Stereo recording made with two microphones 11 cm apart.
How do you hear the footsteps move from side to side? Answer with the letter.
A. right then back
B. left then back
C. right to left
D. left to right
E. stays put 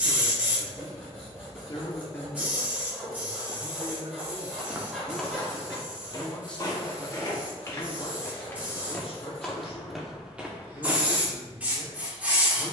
B.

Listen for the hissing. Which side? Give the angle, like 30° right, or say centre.
10° right.